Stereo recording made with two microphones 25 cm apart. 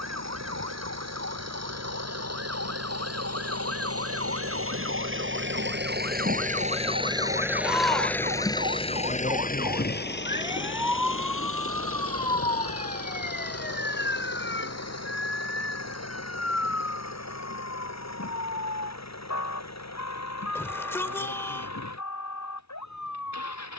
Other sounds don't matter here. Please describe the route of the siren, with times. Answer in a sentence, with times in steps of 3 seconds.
You can hear the siren on the right from 0 s, in the centre from 9 s and on the left from 12 s.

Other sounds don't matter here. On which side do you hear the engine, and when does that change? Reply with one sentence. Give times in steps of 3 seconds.
You can hear the engine on the right from 0 s, in the centre from 6 s and on the left from 9 s.